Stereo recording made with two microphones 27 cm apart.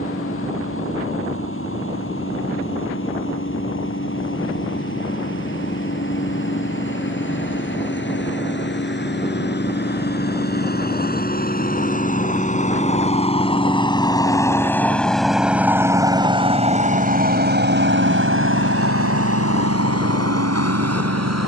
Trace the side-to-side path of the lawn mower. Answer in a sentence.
In this clip you hear the lawn mower move to the right.